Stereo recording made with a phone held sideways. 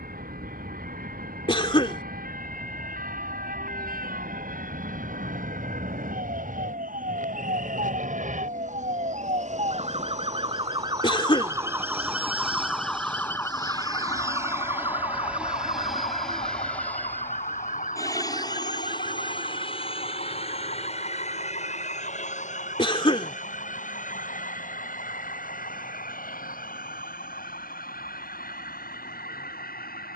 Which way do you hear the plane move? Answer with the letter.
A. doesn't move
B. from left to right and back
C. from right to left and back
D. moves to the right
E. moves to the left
E.